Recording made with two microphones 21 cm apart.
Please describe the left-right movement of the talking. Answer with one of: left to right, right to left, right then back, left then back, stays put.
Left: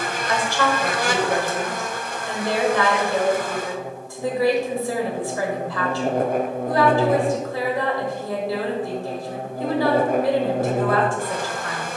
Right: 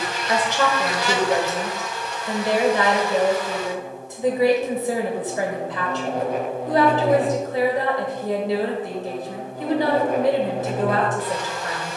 stays put.